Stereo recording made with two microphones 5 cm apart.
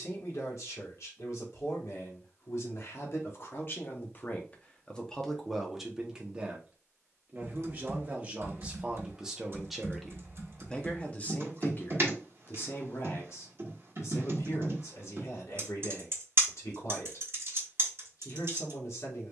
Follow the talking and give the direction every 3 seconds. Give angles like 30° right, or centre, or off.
70° left, 30° left, 20° right, 20° left, 60° left, 70° left, 70° left.